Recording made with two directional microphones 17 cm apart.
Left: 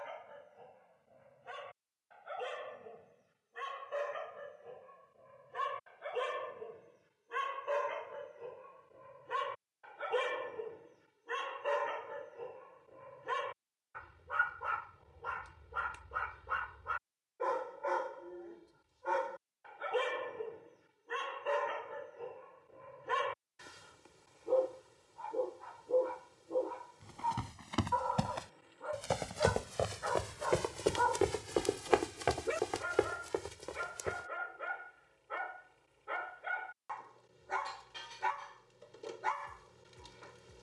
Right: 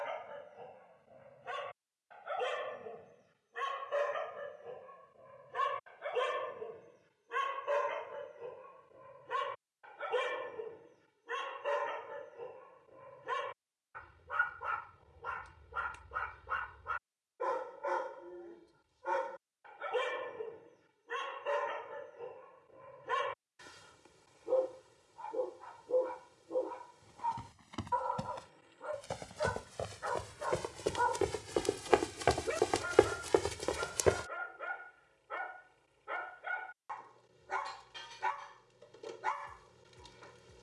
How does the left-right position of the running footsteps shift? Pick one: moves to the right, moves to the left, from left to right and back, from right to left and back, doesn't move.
moves to the right.